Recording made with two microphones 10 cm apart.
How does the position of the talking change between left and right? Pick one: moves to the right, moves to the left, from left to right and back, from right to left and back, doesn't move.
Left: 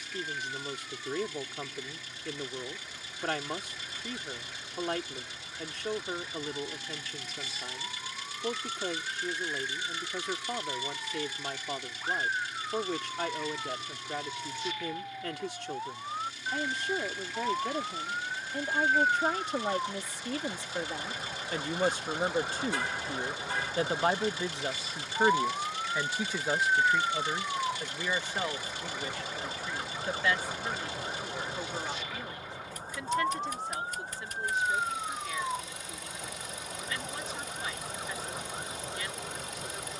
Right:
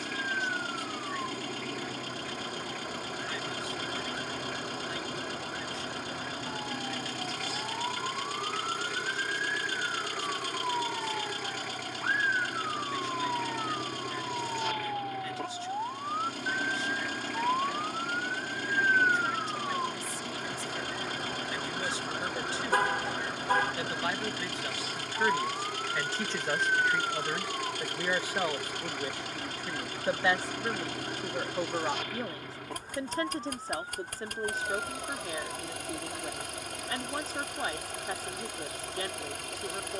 moves to the right.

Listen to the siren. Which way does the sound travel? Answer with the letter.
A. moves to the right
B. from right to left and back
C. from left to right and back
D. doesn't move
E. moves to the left
E.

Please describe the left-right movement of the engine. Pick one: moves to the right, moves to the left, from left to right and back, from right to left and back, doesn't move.
doesn't move.